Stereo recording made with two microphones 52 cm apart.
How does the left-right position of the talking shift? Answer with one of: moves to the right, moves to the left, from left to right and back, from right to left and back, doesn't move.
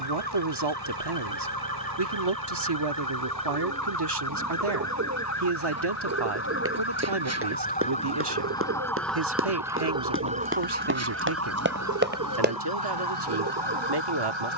doesn't move.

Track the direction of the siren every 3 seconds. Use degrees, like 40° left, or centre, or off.
40° left, 30° left, 20° left, 20° right, 50° right.